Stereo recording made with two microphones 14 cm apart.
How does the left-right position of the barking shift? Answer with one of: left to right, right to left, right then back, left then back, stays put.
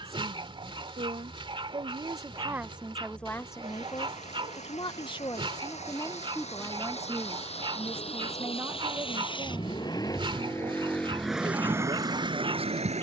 stays put.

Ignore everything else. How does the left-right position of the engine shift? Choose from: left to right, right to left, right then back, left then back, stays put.
left to right.